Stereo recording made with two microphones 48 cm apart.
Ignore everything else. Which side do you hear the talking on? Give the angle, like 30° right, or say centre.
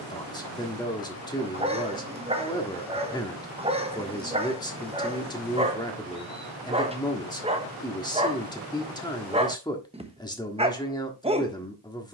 10° left.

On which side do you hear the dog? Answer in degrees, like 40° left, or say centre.
10° right.